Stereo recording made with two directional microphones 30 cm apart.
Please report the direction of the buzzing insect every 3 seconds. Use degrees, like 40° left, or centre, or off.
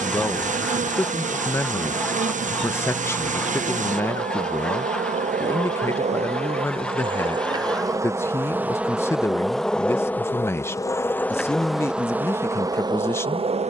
30° right, 20° right, 10° right, centre, 10° right.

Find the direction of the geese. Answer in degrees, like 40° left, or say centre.
centre.